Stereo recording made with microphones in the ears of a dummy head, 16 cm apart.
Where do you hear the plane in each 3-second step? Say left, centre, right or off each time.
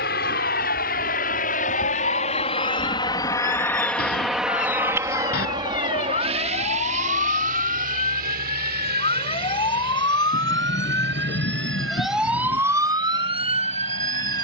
left, centre, right, right, right.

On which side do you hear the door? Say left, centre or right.
left.